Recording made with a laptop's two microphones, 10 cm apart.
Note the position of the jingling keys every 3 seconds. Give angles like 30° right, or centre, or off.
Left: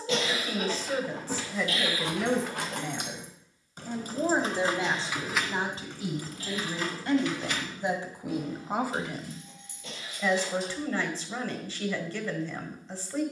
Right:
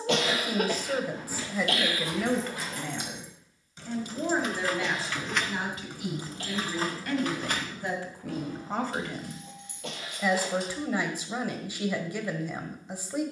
70° left, 20° left, 40° right, 60° right, off.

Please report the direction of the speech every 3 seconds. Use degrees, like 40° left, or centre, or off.
centre, 30° left, 30° left, 10° right, 10° right.